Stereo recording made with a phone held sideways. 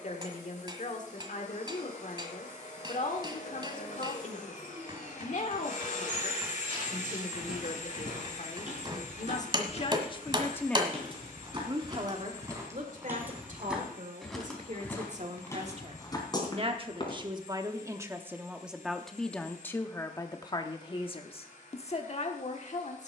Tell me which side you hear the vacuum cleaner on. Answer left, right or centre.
left.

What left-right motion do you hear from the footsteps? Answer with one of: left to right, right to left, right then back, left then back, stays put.
right to left.